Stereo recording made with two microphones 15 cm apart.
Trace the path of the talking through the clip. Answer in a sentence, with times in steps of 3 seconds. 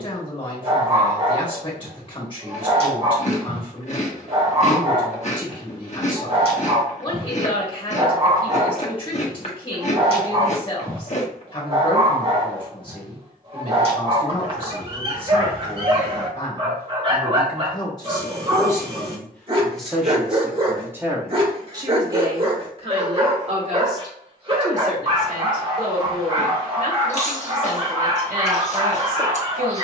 In this clip you hear the talking on the left from 0 s, in the centre from 18 s and on the right from 21 s.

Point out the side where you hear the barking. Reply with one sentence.
You can hear the barking on the right.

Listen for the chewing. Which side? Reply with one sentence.
You can hear the chewing on the left.